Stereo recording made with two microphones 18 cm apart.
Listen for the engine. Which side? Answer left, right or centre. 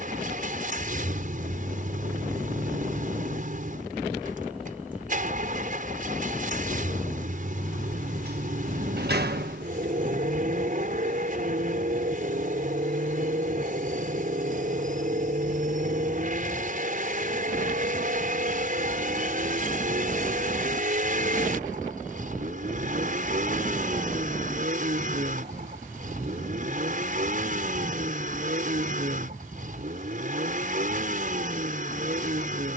right.